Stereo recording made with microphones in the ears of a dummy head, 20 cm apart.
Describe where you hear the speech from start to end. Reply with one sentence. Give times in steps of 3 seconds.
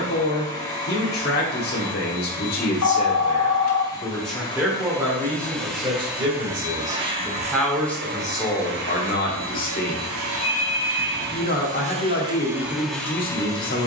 In this clip you hear the speech on the left from 0 s, in the centre from 3 s and on the left from 9 s.